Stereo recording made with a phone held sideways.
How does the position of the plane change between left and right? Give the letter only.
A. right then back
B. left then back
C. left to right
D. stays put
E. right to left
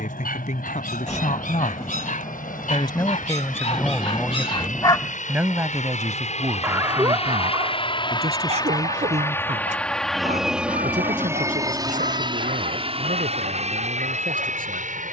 C.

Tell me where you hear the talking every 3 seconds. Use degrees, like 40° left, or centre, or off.
50° left, centre, 40° right, 50° right, 60° right.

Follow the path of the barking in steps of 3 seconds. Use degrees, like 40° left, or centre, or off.
60° left, 40° left, 40° right, 60° right, 70° right.